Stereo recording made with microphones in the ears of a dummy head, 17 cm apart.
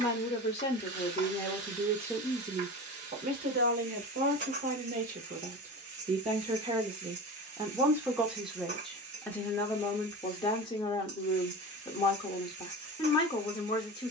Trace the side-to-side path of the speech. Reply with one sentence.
In this clip you hear the speech go right and come back.